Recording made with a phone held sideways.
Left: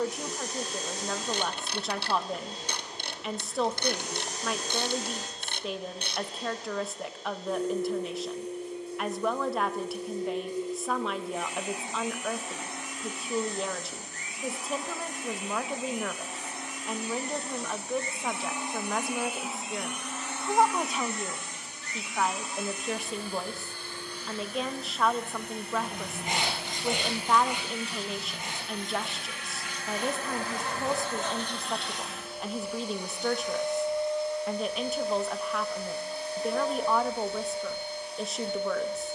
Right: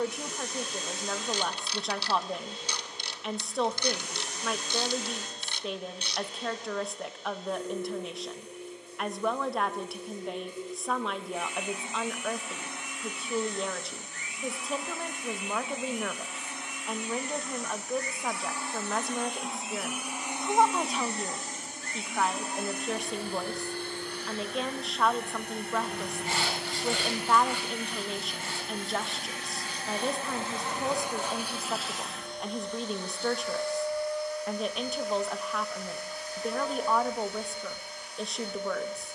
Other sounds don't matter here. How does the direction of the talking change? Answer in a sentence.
In this clip you hear the talking stay in one place.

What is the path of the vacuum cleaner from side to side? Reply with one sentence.
In this clip you hear the vacuum cleaner move from left to right and back again.